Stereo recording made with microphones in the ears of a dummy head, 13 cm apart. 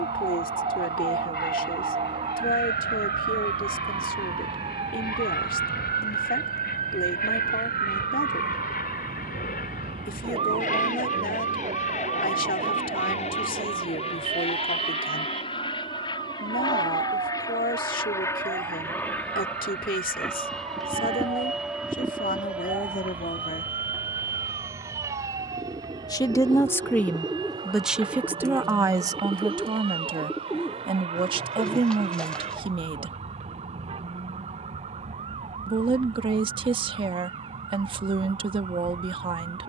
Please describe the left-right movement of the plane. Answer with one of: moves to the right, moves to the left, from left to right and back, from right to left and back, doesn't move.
moves to the right.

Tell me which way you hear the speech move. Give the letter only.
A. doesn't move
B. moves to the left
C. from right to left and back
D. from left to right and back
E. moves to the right
E.